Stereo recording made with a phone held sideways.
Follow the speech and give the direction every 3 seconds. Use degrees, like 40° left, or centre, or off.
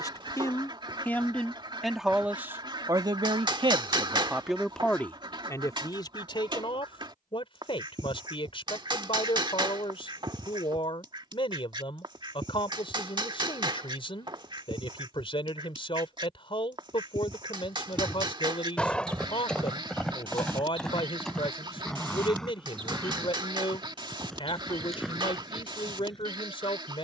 centre, 10° right, 30° left, 30° left, 30° left, 30° left, 30° left, 30° left, 30° left.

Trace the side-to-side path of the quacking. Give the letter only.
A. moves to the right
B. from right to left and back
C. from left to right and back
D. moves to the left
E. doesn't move
E.